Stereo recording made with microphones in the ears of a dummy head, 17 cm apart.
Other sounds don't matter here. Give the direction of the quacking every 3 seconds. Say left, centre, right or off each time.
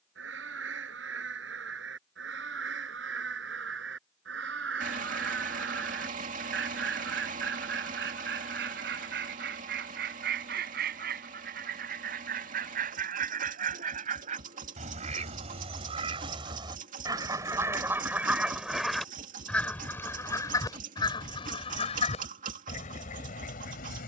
right, right, right, right, right, right, centre, left.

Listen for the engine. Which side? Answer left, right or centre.
right.